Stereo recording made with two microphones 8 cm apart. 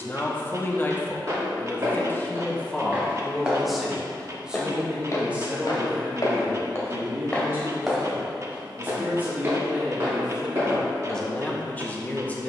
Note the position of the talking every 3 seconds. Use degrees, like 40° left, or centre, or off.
20° left, 10° right, 30° right, centre.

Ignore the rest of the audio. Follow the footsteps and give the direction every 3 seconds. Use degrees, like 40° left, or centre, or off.
30° right, 20° left, 10° left, 30° right.